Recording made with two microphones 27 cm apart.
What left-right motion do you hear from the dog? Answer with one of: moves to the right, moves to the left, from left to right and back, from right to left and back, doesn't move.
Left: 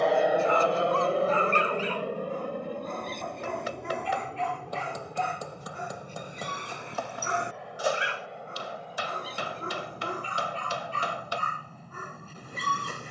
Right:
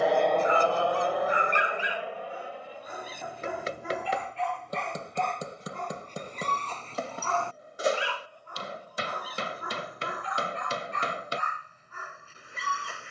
moves to the left.